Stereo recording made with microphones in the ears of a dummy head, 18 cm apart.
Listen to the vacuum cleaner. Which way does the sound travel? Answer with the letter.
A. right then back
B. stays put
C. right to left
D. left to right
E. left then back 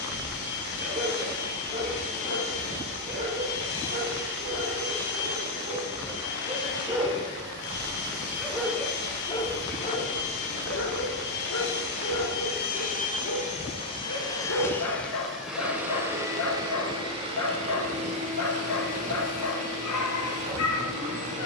D.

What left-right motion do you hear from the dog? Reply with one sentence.
In this clip you hear the dog move to the left.